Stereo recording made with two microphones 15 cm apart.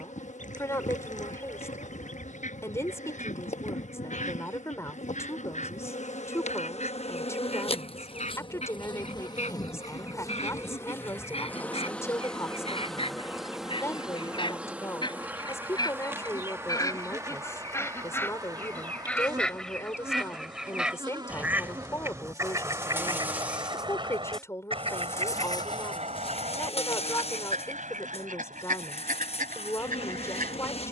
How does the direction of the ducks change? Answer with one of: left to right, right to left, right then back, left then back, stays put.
left to right.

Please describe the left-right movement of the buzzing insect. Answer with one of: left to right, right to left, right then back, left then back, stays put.
right then back.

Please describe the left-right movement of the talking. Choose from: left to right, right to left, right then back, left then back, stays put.
stays put.